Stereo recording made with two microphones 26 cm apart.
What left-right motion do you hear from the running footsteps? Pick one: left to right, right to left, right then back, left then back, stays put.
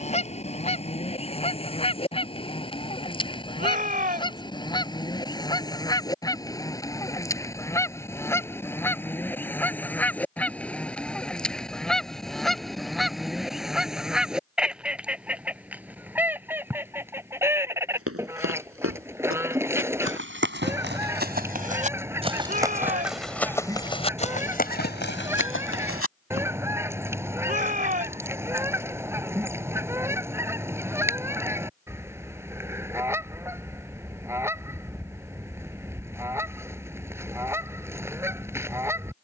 right to left.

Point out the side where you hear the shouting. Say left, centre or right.
right.